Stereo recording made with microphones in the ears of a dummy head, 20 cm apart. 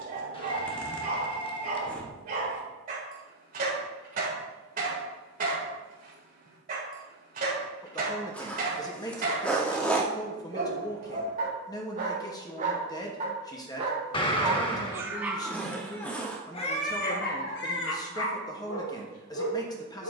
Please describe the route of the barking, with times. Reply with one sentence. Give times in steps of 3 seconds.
In this clip you hear the barking on the right from 0 s and on the left from 15 s.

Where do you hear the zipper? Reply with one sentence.
You can hear the zipper in the centre.